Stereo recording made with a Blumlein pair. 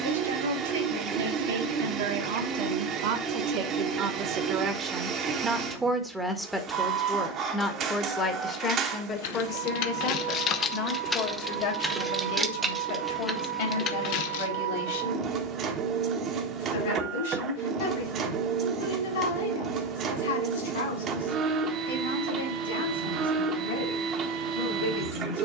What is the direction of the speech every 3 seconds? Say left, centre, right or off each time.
right, right, centre, left, left, left, left, left, left.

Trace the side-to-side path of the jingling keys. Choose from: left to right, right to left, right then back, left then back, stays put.
right then back.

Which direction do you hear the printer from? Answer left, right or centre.
right.